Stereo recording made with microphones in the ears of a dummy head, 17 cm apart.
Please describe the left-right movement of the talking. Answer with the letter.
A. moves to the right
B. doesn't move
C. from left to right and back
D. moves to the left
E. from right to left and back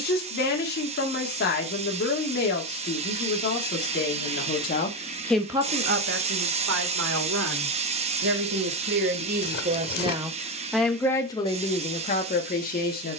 C.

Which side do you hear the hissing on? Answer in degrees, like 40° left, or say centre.
30° right.